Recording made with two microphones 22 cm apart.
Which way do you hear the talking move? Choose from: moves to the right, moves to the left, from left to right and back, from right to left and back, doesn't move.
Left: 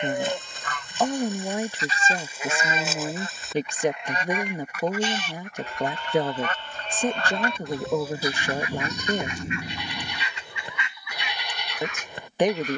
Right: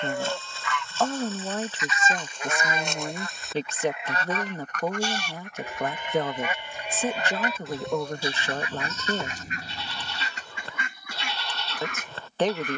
doesn't move.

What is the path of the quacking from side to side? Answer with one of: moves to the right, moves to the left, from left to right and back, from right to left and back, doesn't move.
moves to the right.